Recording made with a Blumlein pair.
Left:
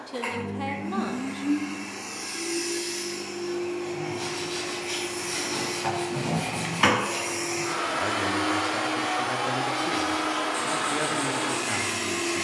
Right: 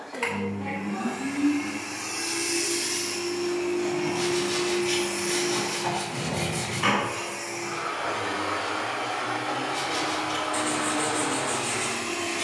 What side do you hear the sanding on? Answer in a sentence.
In this clip you hear the sanding on the right.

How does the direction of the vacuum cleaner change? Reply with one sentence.
In this clip you hear the vacuum cleaner move to the left.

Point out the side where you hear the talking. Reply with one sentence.
In this clip you hear the talking on the left.